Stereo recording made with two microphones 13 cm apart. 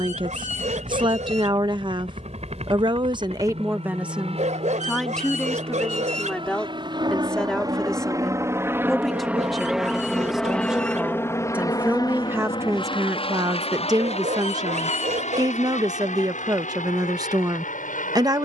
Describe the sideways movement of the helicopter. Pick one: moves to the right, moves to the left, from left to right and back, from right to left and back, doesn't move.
moves to the left.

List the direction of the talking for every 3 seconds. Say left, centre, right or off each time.
right, centre, centre, centre, right, right.